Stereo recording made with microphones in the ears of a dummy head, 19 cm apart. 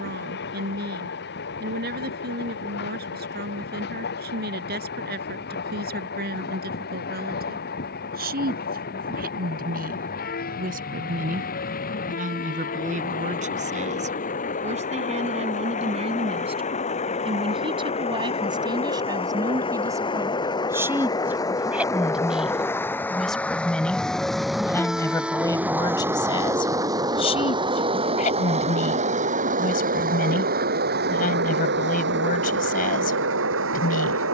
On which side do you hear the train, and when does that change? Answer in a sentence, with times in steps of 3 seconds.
In this clip you hear the train on the left from 0 s, in the centre from 21 s and on the right from 27 s.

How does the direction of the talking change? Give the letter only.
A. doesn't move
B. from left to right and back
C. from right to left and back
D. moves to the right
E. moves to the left
E.